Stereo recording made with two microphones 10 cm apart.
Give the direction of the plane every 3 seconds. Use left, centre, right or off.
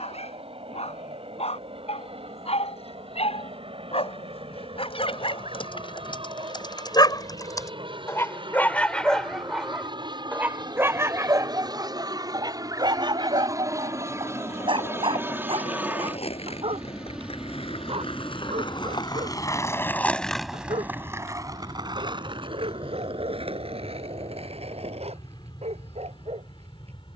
right, right, right, right, right, centre, centre, left, left.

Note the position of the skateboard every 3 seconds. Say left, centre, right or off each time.
off, off, off, off, left, left, left, right, right.